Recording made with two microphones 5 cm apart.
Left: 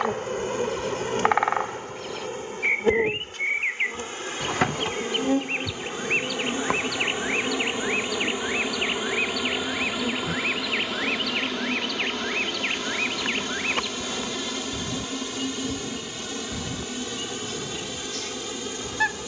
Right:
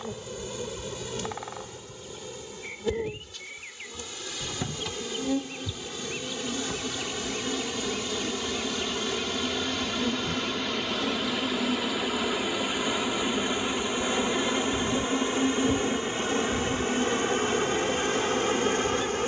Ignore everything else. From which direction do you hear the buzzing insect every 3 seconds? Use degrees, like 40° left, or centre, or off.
50° left, 40° left, 20° left, centre, 20° right, 40° right, 50° right.